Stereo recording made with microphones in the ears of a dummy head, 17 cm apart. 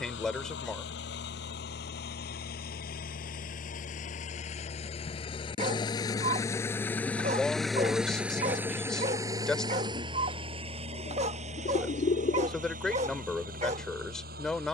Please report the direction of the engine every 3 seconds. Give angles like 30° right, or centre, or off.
60° left, 40° left, centre, 30° right, 50° right.